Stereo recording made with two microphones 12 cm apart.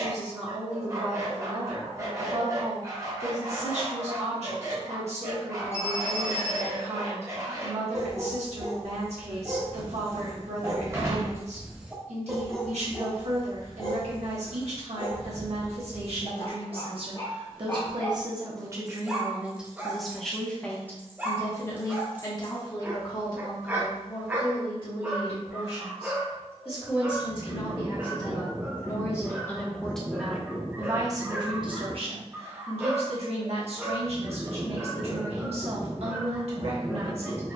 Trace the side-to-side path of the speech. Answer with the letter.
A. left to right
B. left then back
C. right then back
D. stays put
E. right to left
B.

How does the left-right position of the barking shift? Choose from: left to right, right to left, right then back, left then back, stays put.
left then back.